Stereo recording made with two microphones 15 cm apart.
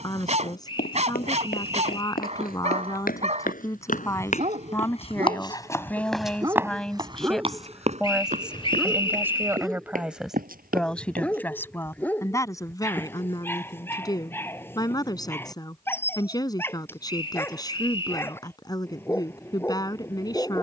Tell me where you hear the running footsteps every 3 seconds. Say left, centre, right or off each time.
left, left, right, right, off, off, off.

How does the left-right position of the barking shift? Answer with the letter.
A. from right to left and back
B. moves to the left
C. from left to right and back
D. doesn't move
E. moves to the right
B.